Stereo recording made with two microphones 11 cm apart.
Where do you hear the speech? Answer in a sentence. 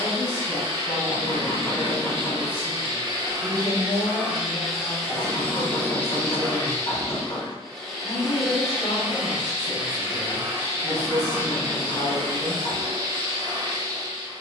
In this clip you hear the speech on the left.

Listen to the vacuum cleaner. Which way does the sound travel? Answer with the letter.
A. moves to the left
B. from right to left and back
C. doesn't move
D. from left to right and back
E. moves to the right
B.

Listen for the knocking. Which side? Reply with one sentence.
In this clip you hear the knocking on the left.